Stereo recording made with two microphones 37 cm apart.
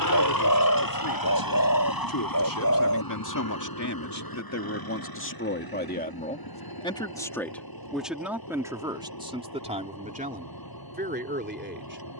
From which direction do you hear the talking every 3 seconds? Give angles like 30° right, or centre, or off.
70° left, 40° left, centre, 20° right.